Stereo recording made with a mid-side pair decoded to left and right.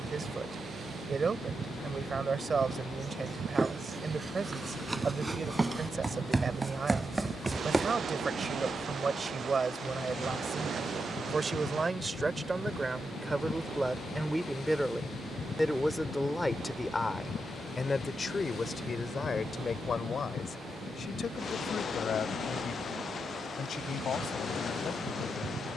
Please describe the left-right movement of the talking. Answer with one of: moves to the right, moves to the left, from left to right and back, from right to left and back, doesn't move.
moves to the left.